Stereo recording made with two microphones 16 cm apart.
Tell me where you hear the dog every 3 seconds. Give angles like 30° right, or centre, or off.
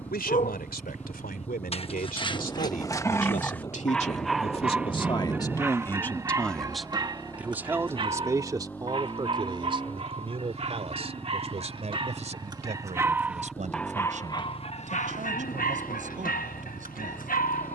40° left, centre, 30° right, 40° right, centre, 60° left.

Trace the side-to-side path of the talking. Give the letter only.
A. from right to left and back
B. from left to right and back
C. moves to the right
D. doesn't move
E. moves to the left
C.